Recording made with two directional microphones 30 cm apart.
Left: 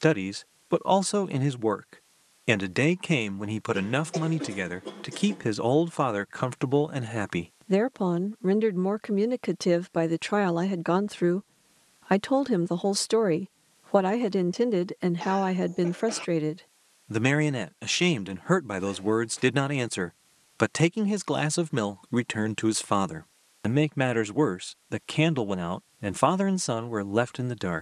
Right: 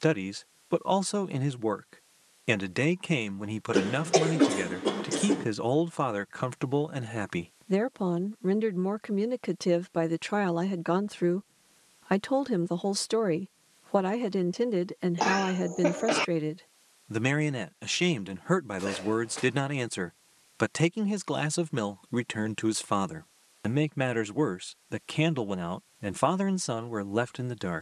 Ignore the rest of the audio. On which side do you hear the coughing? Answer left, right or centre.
right.